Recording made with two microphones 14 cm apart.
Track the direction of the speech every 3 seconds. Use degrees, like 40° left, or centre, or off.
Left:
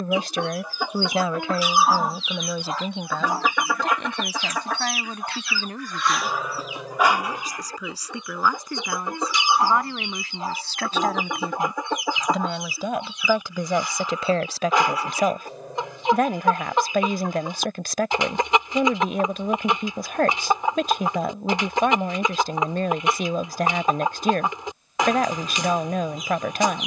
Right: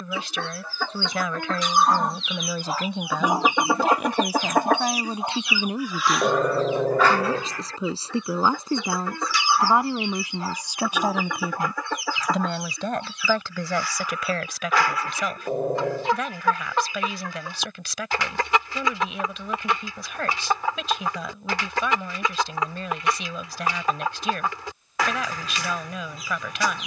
20° left, 10° right, 30° right, 20° right, 20° left, 50° left, 50° left, 50° left, 50° left.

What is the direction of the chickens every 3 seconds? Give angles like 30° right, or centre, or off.
10° left, 30° right, 10° left, 20° left, 20° left, 20° left, 20° left, 20° left, 20° left.